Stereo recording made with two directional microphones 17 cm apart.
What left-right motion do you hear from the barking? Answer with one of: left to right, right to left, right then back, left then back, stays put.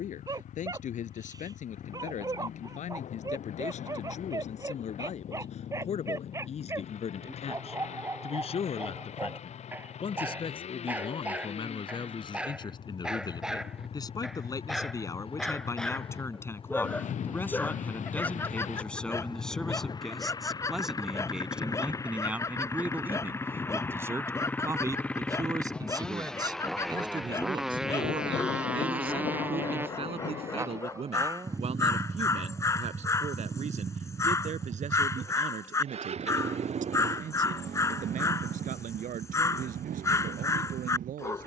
right to left.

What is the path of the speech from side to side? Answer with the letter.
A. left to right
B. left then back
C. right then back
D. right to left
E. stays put
A.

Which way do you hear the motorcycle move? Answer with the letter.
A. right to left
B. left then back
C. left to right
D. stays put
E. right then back
C.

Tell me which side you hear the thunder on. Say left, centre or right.
left.